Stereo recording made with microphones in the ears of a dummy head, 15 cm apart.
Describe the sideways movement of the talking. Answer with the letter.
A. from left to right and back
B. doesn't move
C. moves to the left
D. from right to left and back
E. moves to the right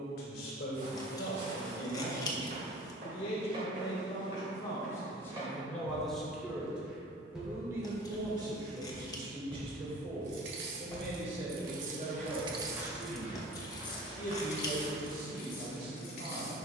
E.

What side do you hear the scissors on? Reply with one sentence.
You can hear the scissors on the left.